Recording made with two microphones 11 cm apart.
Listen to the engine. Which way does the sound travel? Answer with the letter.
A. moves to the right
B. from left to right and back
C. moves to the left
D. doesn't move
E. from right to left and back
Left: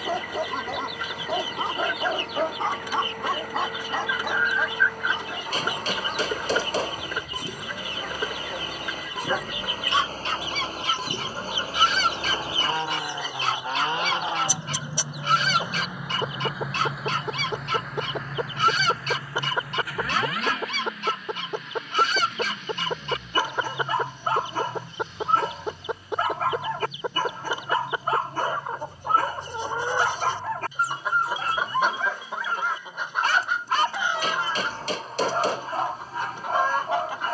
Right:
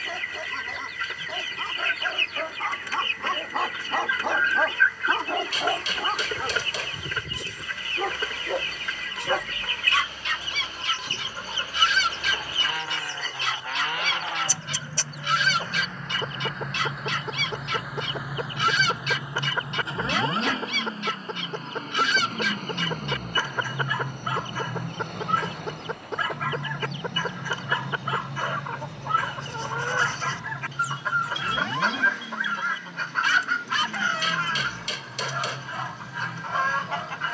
A.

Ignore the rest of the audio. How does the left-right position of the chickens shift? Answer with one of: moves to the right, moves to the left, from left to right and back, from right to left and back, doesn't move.
doesn't move.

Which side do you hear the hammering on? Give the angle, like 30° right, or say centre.
40° left.